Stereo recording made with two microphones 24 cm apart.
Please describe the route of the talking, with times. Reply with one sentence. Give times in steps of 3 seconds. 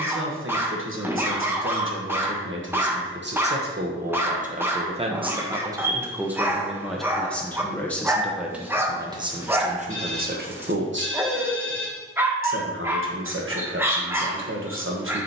In this clip you hear the talking on the right from 0 s, in the centre from 6 s and on the right from 9 s.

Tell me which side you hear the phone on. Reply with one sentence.
You can hear the phone on the right.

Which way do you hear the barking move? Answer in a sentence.
In this clip you hear the barking stay in one place.